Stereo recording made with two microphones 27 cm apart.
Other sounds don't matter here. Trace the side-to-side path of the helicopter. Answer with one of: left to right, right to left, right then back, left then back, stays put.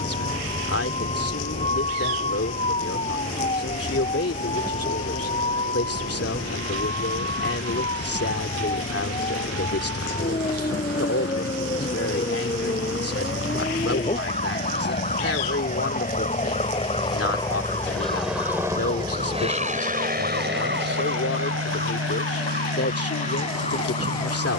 left to right.